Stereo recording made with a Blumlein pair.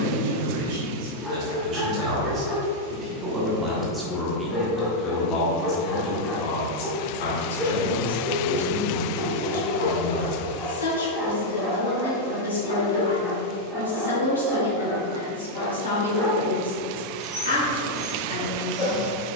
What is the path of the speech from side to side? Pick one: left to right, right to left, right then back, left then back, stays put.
right to left.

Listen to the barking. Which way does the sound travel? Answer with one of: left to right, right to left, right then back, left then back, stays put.
stays put.